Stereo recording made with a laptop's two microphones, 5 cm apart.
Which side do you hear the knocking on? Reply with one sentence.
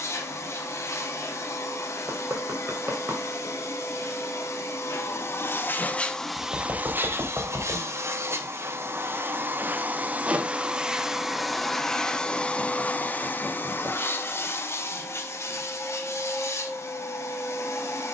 You can hear the knocking on the right.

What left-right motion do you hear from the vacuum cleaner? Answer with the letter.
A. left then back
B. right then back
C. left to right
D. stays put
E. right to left
B.